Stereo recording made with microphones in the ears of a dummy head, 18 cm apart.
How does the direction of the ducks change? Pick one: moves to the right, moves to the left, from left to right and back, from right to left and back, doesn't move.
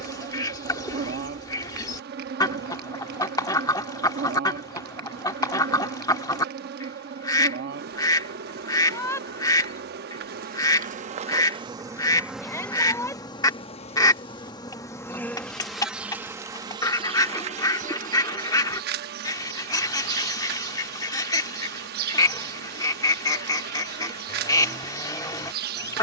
doesn't move.